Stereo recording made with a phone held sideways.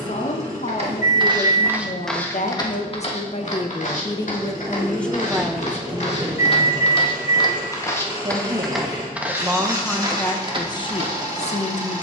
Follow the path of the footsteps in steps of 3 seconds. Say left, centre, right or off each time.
centre, left, left, right.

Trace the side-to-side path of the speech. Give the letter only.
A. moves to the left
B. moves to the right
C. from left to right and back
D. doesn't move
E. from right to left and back
C.